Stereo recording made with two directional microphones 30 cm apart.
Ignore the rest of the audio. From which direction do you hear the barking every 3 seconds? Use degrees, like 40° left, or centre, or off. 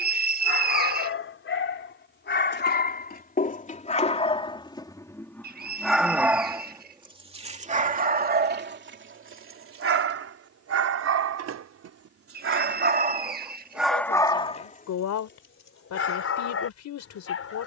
40° left, 20° left, 20° right, 50° right, 10° right, 40° left.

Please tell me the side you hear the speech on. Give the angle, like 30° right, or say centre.
60° left.